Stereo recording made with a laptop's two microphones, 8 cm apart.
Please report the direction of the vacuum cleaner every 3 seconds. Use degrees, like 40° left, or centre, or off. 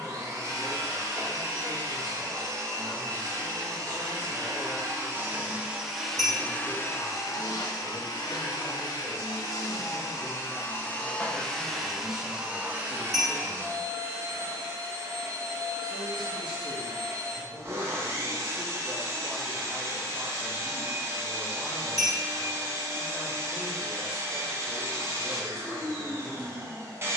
40° right, 30° right, 40° left, 30° left, 30° right, 30° right, 30° right, 30° right, 30° right.